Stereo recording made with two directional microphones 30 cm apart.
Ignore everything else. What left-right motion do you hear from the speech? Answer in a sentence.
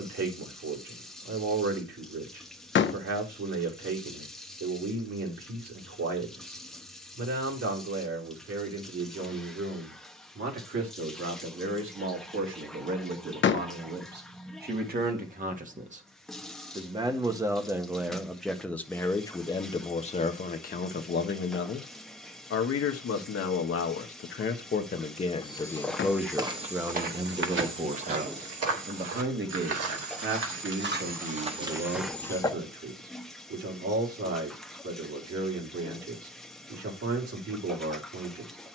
In this clip you hear the speech go left and come back.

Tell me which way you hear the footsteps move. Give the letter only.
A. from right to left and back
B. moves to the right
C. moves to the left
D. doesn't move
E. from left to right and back
E.